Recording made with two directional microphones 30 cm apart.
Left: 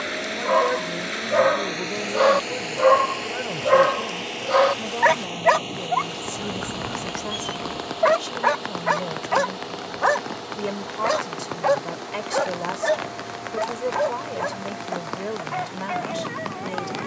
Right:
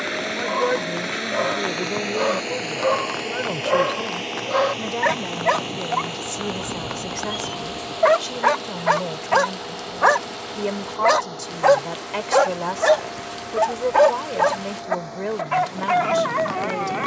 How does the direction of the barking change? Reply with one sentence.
In this clip you hear the barking move from left to right.